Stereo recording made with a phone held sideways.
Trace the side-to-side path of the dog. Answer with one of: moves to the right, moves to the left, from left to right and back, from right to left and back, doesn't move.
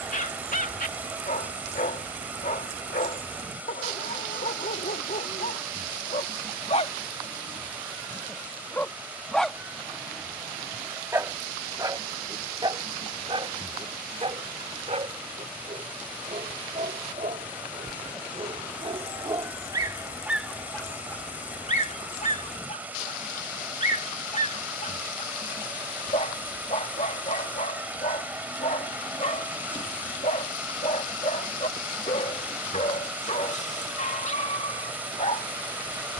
from left to right and back.